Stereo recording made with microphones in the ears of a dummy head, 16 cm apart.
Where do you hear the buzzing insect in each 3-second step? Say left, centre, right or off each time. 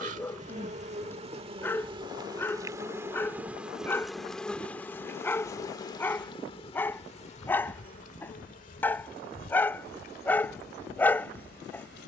right, centre, left, left.